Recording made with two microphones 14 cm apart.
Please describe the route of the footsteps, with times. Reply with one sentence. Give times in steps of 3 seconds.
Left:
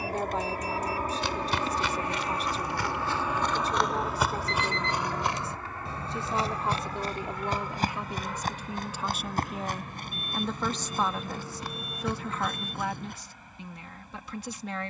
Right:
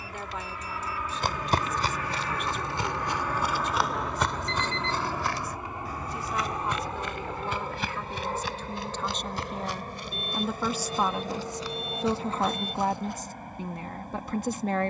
You can hear the footsteps on the right from 0 s, in the centre from 3 s and on the left from 6 s.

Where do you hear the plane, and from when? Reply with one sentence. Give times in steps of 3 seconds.
You can hear the plane on the left from 0 s, in the centre from 3 s and on the right from 6 s.